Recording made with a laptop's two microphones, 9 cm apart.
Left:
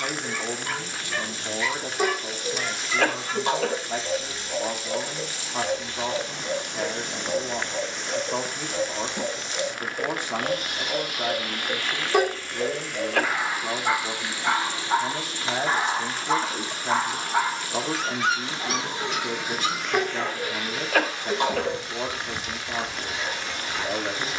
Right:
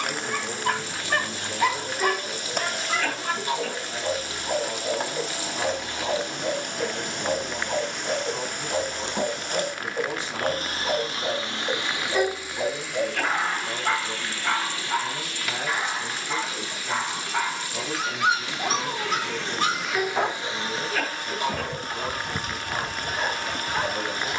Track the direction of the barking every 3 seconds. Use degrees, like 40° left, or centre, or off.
50° right, 50° right, 50° right, 50° right, 10° right, 30° left, 40° right, 50° right.